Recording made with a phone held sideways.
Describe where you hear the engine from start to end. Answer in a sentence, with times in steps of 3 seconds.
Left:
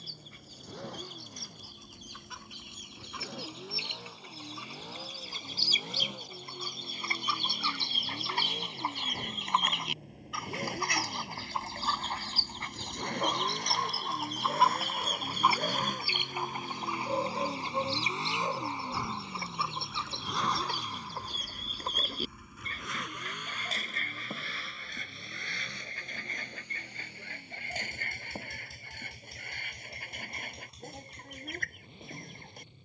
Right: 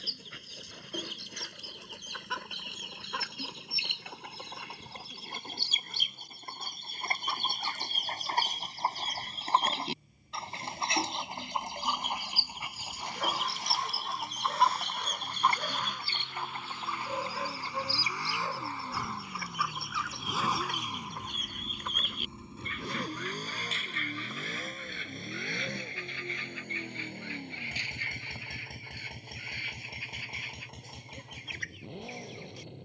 You can hear the engine on the left from 0 s, in the centre from 18 s and on the right from 21 s.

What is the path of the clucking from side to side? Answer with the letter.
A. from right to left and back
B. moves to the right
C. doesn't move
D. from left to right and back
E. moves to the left
E.